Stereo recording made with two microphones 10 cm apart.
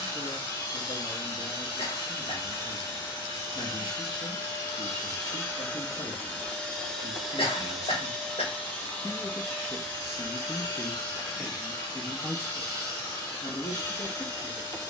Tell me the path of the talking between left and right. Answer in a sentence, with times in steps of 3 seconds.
In this clip you hear the talking on the left from 0 s, in the centre from 9 s and on the left from 12 s.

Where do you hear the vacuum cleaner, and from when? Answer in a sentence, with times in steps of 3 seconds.
You can hear the vacuum cleaner on the left from 0 s, in the centre from 6 s and on the left from 9 s.